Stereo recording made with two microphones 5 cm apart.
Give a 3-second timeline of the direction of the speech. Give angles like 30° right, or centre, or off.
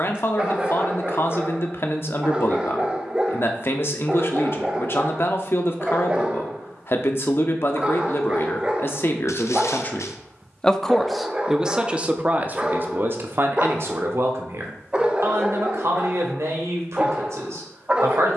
50° left, 50° left, 50° left, 20° left, 50° right, 70° right.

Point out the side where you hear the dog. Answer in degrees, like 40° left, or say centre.
20° right.